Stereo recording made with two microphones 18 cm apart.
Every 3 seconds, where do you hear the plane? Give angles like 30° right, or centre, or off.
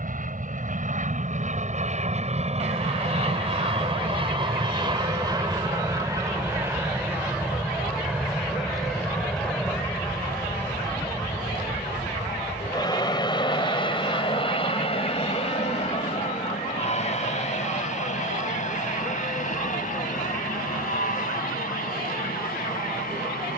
40° right, 30° right, 10° right, 10° left, 20° left, 30° left, 40° left, 50° left.